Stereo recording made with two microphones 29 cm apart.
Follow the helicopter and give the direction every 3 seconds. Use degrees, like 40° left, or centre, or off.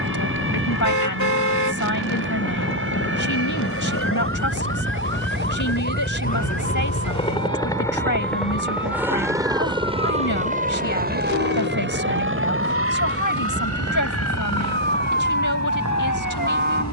60° left, 40° left, 10° left, 20° right, 50° right, 60° right.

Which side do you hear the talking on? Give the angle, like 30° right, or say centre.
80° left.